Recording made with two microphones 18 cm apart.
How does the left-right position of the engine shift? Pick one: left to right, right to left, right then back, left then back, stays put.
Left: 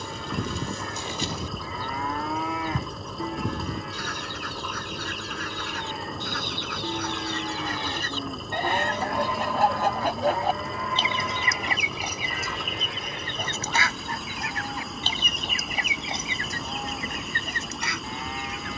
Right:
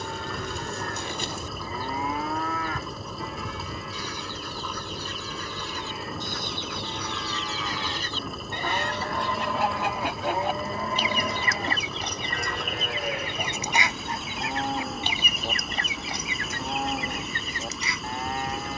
stays put.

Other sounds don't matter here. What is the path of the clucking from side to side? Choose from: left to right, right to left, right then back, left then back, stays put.
right then back.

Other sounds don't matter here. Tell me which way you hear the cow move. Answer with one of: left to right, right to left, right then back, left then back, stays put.
left then back.